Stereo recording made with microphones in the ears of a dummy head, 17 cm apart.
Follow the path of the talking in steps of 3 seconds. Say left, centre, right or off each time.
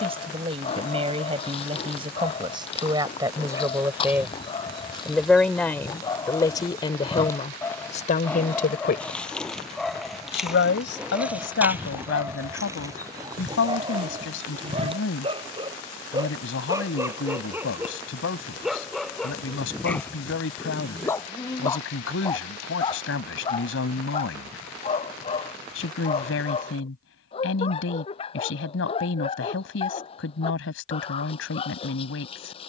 right, centre, left, left, left, left, left, left, left, left, left.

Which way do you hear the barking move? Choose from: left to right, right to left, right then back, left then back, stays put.
right then back.